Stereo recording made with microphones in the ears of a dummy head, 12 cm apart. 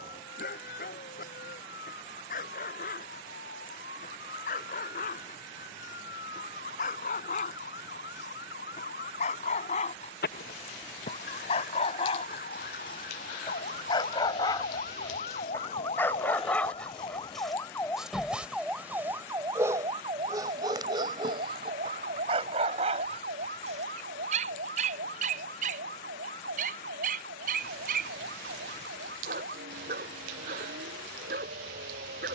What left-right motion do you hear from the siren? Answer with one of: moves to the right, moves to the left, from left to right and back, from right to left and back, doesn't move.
moves to the right.